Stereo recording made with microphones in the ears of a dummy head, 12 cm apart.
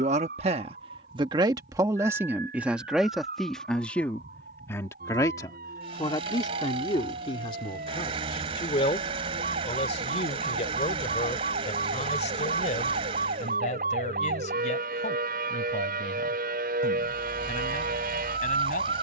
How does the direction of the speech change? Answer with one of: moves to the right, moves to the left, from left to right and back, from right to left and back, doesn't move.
moves to the left.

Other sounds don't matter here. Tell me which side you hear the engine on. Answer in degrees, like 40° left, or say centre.
40° right.